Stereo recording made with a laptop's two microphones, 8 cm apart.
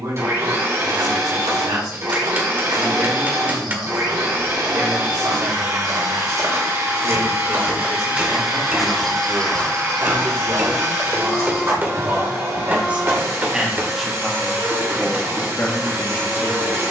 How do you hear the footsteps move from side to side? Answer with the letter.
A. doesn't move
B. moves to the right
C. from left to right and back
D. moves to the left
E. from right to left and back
D.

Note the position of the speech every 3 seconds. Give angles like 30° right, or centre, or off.
50° right, 50° right, 50° right, 40° right, 10° right, 30° left.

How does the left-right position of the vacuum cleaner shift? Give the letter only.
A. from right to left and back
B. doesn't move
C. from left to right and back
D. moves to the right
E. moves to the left
B.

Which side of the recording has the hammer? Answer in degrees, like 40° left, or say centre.
30° right.